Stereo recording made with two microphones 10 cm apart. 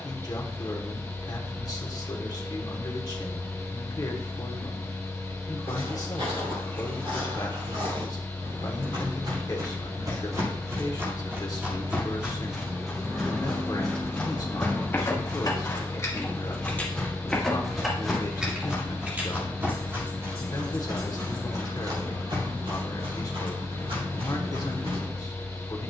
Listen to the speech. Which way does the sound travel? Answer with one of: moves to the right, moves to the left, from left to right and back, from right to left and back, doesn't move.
doesn't move.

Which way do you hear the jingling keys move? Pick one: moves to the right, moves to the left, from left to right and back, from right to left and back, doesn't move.
from right to left and back.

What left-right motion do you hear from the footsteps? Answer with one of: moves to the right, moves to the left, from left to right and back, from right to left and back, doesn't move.
from right to left and back.